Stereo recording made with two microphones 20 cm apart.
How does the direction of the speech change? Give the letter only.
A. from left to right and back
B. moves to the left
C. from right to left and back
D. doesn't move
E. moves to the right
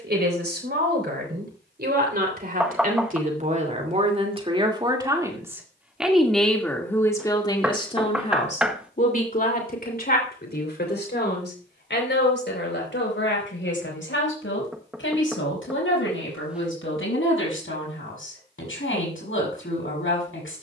B.